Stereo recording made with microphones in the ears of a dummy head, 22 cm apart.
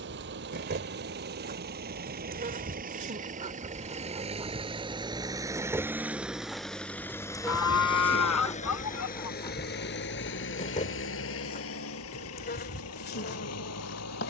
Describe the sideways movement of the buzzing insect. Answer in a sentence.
In this clip you hear the buzzing insect move to the left.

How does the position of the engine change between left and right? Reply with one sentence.
In this clip you hear the engine move from right to left.